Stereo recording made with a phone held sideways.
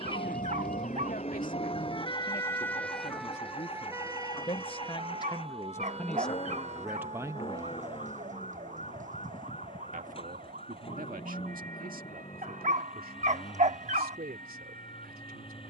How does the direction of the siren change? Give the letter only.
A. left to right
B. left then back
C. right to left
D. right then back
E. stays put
A.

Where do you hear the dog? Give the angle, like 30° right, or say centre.
50° right.